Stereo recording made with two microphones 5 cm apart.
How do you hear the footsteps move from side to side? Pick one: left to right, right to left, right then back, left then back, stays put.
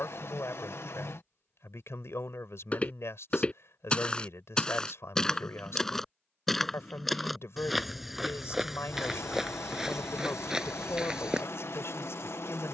left to right.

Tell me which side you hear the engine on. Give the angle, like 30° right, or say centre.
60° left.